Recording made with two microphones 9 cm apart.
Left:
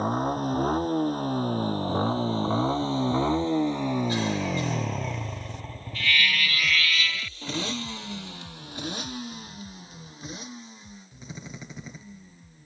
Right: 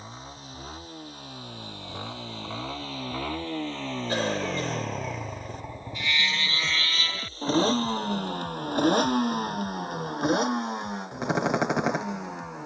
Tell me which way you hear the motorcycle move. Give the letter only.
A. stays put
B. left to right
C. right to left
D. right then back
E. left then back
B.